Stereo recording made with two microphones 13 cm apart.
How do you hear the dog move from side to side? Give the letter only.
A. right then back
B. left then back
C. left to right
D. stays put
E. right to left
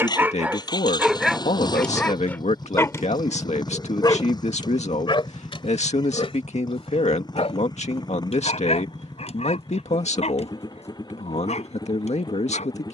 E.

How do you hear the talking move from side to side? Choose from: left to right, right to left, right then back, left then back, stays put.
stays put.